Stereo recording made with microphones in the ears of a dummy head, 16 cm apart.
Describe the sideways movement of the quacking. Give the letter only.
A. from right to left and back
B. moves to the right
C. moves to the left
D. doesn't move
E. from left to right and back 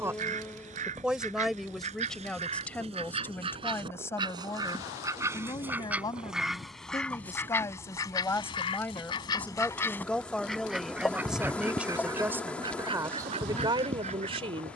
A.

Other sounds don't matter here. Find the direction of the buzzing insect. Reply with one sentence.
You can hear the buzzing insect in the centre.